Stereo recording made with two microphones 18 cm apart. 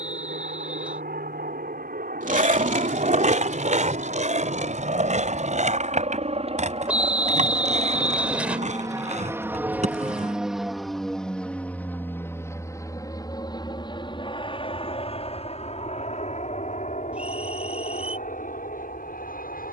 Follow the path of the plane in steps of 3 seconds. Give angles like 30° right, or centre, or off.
60° right, 50° right, 30° right, centre, 20° left, 40° left, 50° left.